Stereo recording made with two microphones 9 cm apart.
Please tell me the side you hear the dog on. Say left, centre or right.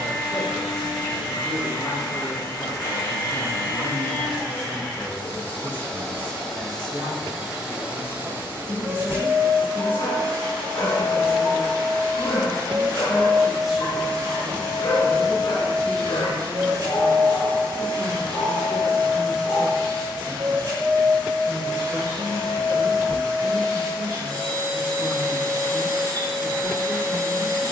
left.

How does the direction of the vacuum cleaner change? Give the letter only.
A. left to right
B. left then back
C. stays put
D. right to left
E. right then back
A.